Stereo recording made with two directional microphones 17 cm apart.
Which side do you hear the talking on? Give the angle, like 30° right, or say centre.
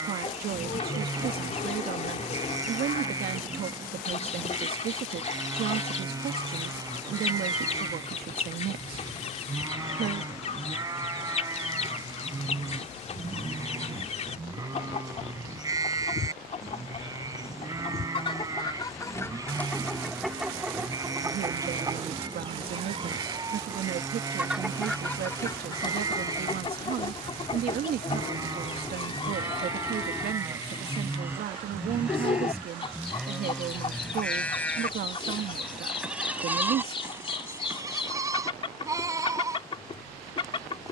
60° right.